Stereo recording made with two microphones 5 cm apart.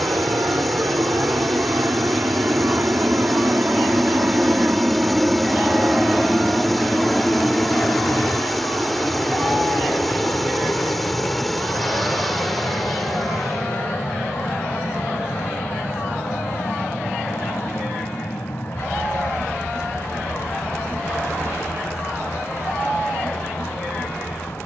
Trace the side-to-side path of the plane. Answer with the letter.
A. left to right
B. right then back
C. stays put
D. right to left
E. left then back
D.